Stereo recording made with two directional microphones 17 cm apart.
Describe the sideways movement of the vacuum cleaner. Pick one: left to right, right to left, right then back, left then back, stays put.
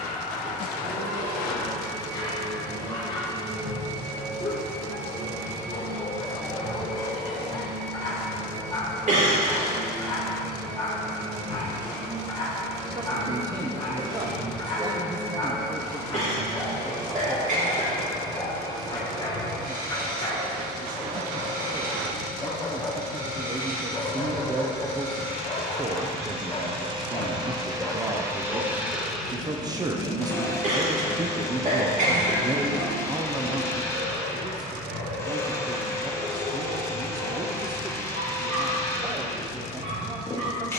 right to left.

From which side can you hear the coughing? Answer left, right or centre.
right.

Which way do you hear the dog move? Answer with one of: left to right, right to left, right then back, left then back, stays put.
left to right.